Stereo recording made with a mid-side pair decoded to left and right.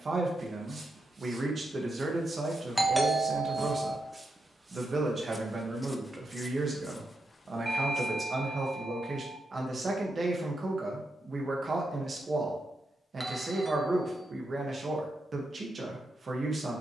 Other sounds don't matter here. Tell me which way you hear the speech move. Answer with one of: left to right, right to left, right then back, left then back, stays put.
stays put.